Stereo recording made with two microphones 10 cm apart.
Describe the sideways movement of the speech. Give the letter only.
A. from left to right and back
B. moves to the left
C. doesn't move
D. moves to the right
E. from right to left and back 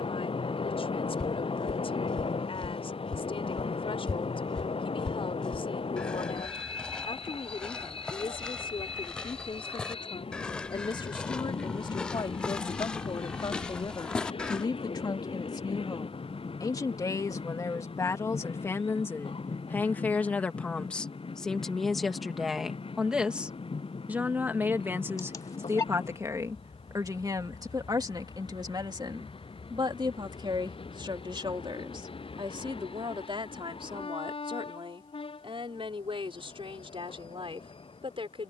D.